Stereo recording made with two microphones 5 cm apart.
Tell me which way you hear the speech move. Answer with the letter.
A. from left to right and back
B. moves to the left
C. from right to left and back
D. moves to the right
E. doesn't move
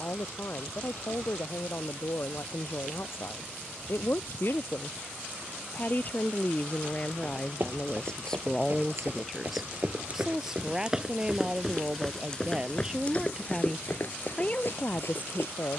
A.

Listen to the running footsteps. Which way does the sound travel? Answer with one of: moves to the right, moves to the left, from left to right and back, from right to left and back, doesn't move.
moves to the left.